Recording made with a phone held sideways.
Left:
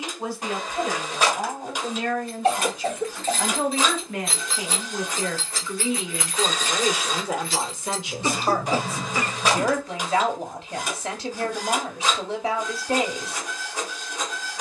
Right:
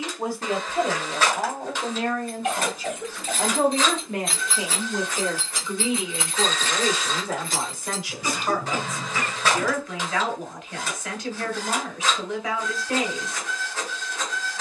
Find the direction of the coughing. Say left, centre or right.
left.